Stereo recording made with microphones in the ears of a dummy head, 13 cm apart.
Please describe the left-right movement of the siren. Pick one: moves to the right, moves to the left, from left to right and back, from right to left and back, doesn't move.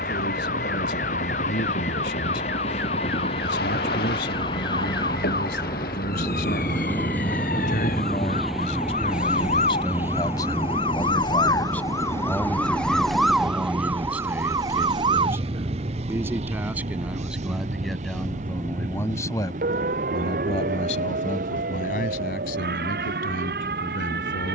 moves to the right.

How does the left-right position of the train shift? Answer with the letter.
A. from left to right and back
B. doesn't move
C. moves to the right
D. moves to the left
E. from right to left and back
C.